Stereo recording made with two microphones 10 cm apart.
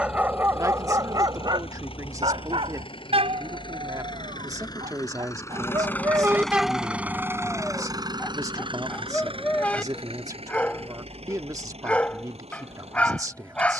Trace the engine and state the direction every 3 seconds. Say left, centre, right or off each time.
left, left, right, right, right.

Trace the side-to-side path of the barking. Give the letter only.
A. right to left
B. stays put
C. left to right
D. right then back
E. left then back
D.